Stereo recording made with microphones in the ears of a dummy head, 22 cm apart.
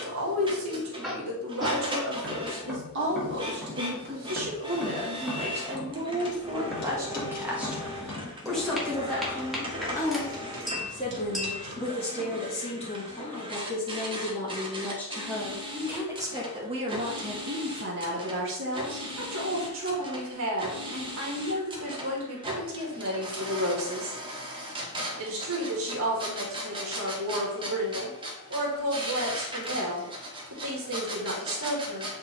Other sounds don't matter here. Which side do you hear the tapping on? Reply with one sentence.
You can hear the tapping in the centre.